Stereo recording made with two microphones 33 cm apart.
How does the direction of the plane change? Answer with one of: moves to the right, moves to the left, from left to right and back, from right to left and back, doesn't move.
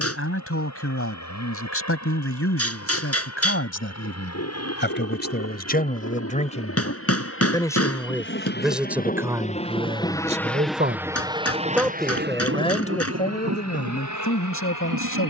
moves to the right.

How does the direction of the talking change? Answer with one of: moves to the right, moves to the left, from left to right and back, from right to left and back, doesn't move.
from left to right and back.